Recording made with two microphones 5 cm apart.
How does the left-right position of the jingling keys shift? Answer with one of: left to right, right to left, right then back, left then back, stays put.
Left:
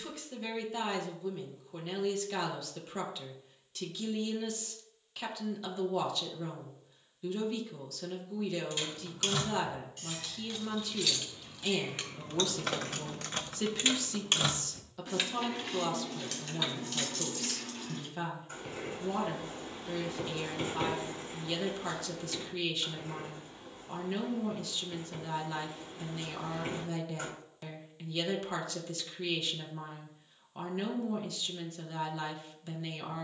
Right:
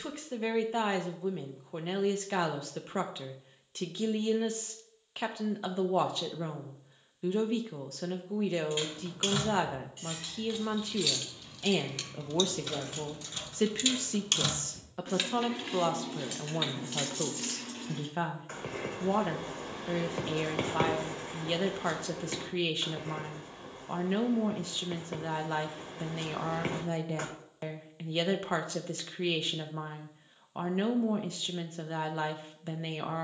left then back.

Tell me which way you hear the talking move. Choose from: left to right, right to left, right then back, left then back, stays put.
stays put.